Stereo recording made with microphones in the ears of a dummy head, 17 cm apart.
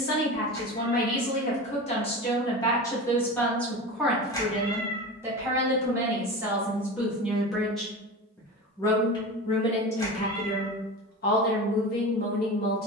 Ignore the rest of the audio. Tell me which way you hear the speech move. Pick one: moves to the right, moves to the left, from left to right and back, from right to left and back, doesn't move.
from left to right and back.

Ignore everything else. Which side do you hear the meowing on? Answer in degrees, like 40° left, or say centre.
20° left.